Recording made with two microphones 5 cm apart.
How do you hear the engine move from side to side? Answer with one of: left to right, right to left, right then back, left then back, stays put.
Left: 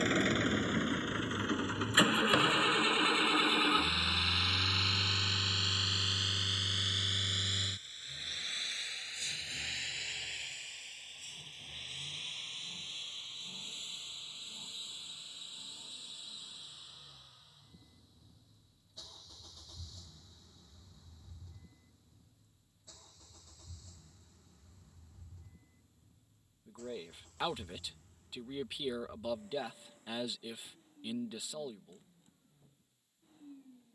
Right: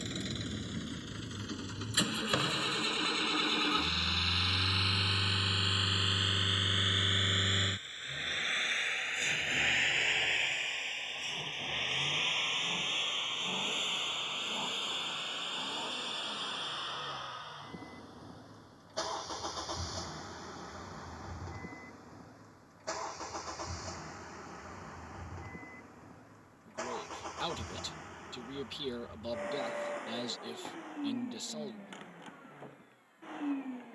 left to right.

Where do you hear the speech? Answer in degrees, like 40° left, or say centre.
10° left.